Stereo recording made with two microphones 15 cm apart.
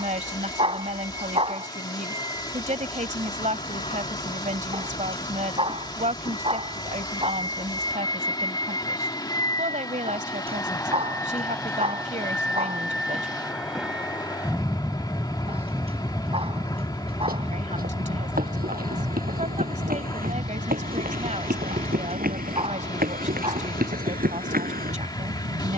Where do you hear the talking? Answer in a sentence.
You can hear the talking on the right.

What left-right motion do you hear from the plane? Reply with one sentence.
You can hear the plane move to the right.